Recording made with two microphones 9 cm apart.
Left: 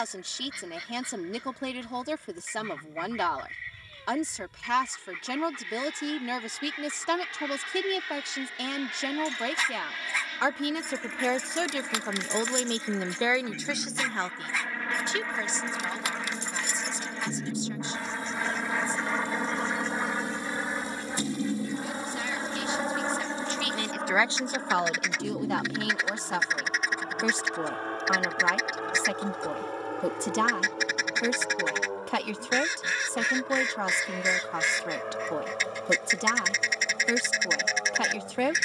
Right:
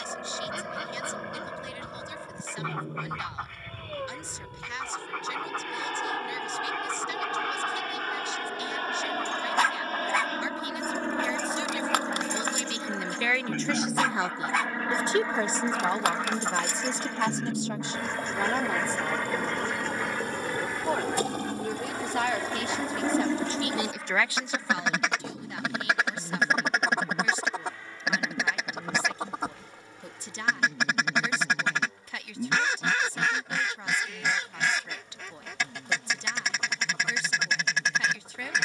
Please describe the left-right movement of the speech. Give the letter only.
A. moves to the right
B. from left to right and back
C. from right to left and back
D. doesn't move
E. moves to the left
B.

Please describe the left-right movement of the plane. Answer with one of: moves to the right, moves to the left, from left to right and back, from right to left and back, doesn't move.
moves to the left.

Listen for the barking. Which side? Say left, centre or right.
right.